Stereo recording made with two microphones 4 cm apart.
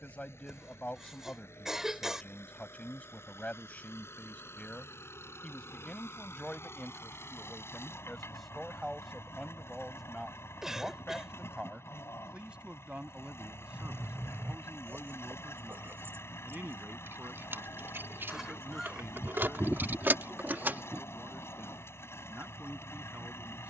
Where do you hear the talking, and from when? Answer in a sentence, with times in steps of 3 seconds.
In this clip you hear the talking on the left from 0 s, in the centre from 6 s and on the right from 12 s.